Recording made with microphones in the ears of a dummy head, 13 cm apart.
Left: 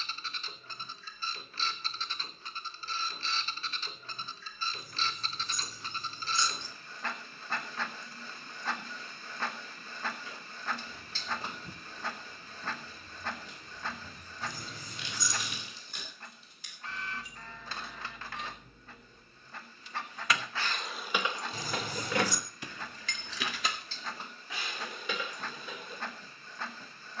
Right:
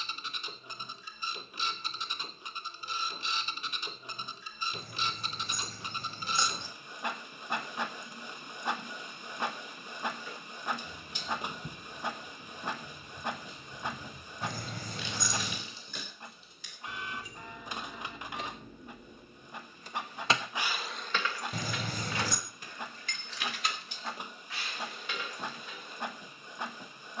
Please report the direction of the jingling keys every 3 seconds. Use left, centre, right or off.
off, off, off, right, right, right, right, left, left.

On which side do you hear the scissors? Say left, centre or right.
right.